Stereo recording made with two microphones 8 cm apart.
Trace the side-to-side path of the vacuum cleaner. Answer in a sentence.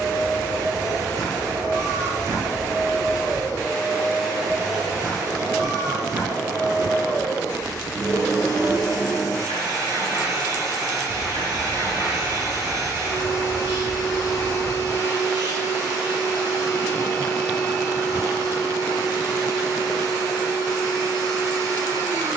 In this clip you hear the vacuum cleaner stay put.